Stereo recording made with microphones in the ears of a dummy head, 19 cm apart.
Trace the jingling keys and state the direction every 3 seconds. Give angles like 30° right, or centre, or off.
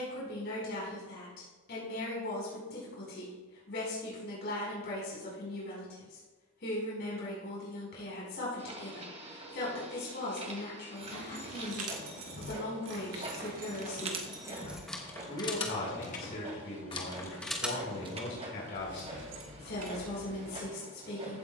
off, off, off, 70° right, 40° right, 20° left, 60° right.